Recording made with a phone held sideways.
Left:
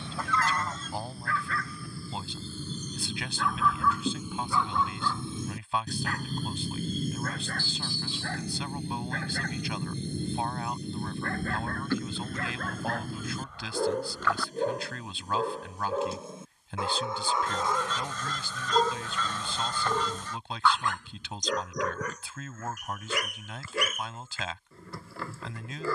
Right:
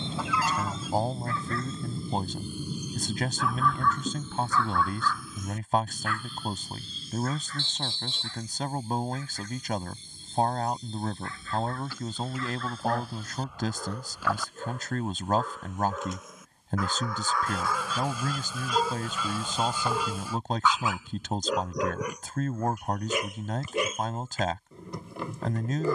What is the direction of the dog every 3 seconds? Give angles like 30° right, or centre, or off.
20° right, 10° left, 60° left, 60° left, 50° left, 30° left, 10° left, 10° right, 20° right.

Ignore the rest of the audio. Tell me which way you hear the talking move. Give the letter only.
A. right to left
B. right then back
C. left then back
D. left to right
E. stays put
E.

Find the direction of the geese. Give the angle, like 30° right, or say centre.
10° right.